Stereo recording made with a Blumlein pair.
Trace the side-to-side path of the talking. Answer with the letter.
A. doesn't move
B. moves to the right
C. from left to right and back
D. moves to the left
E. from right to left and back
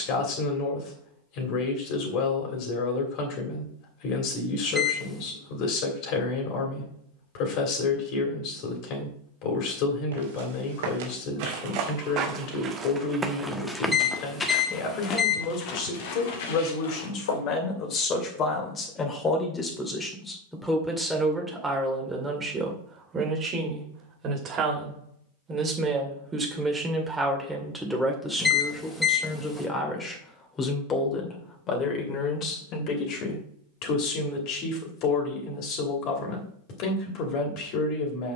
C.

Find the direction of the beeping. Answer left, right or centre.
centre.